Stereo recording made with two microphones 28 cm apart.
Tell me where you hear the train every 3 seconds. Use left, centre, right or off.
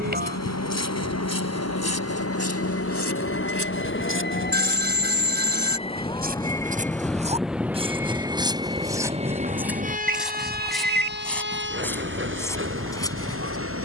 left, left, centre, right, right.